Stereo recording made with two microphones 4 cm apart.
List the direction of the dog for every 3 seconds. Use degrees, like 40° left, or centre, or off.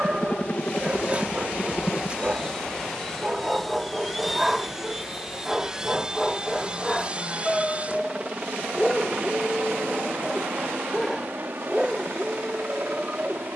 30° right, 10° right, 10° left, 10° left, 20° right.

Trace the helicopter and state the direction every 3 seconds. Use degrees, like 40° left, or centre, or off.
20° left, centre, 30° right, 40° right, 50° right.